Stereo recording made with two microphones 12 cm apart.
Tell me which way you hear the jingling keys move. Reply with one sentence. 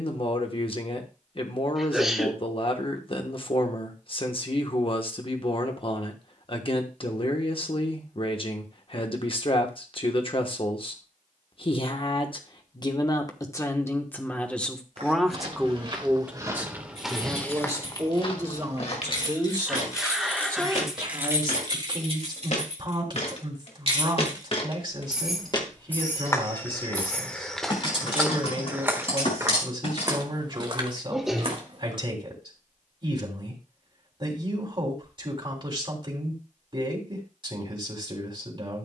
You can hear the jingling keys move from left to right and back again.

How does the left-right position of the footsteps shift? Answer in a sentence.
You can hear the footsteps move from right to left and back again.